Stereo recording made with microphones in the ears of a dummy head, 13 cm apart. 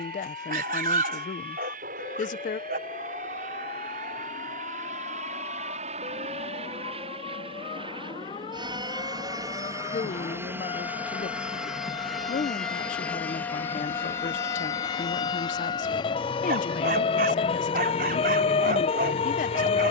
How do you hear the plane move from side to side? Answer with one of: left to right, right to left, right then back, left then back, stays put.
right to left.